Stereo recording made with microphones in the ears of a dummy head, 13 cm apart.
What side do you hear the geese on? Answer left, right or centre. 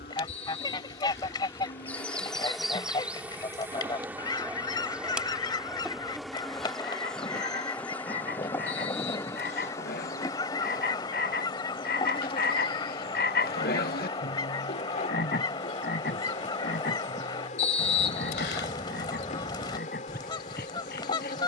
left.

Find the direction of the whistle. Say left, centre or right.
left.